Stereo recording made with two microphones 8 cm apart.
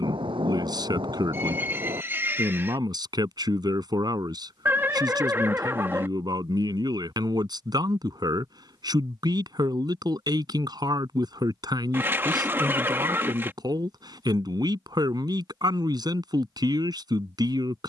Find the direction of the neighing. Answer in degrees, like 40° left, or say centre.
30° right.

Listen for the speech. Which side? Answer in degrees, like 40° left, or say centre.
50° right.